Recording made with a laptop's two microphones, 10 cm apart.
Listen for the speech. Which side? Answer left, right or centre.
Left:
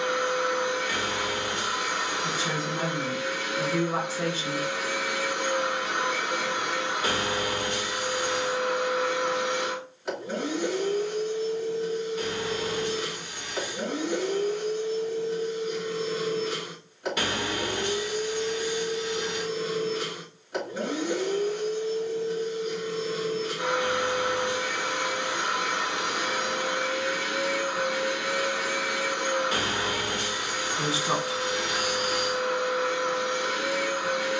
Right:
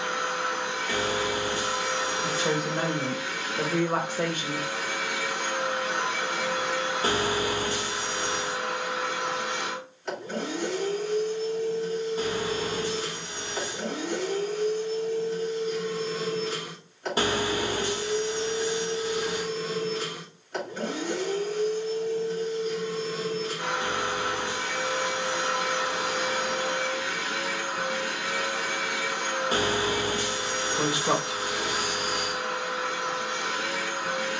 right.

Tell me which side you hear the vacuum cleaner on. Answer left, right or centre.
centre.